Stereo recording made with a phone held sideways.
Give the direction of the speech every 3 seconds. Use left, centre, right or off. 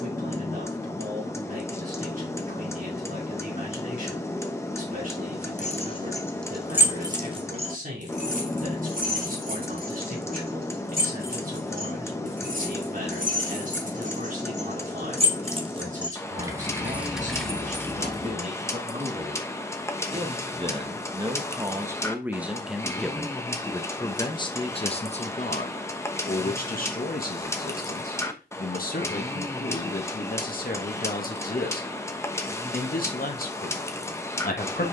right, right, right, right, right, right, right, centre, left, left, left, left.